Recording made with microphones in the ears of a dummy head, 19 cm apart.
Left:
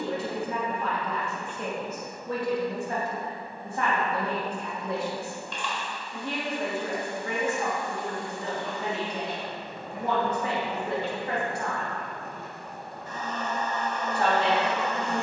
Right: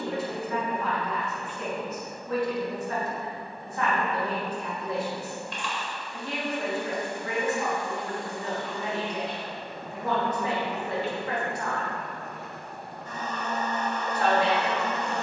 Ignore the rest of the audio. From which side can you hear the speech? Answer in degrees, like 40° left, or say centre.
20° left.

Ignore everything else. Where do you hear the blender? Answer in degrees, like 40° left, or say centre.
30° right.